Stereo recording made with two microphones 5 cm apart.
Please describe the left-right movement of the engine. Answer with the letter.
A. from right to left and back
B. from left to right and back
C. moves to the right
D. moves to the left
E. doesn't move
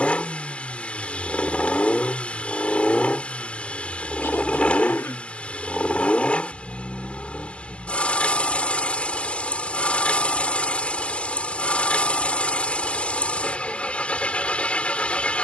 E.